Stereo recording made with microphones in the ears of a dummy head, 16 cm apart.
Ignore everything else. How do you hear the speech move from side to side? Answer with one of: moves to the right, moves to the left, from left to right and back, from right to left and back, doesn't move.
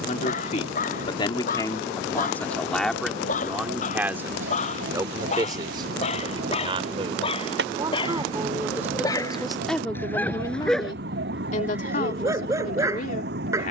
from left to right and back.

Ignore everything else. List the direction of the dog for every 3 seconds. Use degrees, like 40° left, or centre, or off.
50° left, 40° left, 30° left, 10° left, 20° right.